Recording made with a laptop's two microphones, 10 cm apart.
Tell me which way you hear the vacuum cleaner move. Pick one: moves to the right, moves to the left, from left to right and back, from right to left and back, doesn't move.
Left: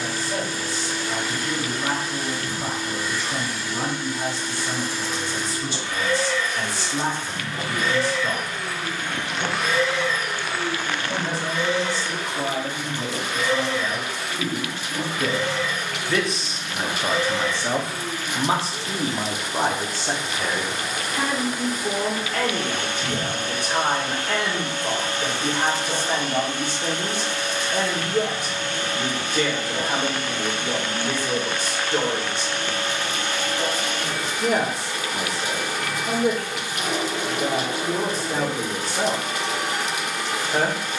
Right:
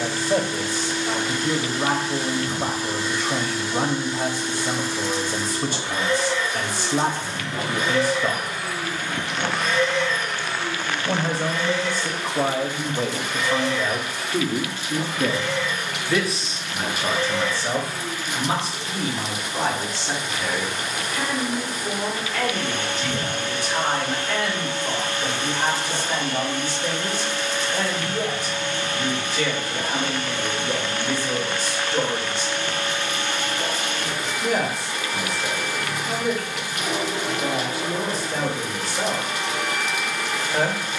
moves to the left.